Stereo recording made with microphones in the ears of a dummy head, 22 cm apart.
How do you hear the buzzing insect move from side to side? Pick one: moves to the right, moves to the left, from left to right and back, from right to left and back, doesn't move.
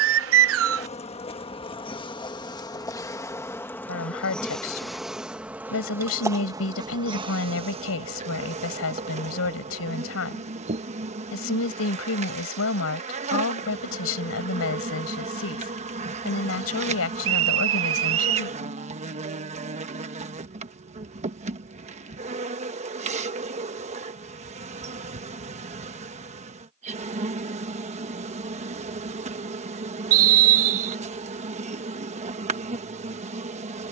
moves to the right.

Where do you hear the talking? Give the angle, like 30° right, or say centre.
60° left.